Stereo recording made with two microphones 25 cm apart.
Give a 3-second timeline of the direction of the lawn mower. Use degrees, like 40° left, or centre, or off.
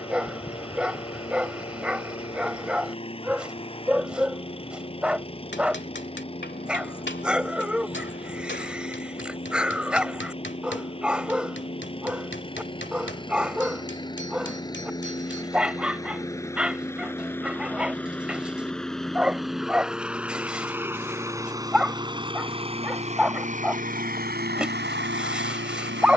20° left, 20° left, 20° left, 20° left, 20° left, 10° left, centre, 20° right, 40° right.